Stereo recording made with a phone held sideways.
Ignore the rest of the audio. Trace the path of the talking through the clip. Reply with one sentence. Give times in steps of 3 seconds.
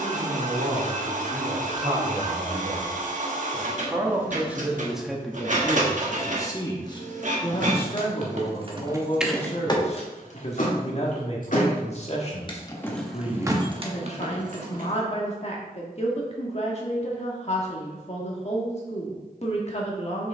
In this clip you hear the talking on the right from 0 s, in the centre from 3 s and on the left from 6 s.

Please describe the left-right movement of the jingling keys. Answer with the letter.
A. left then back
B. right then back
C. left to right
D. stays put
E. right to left
A.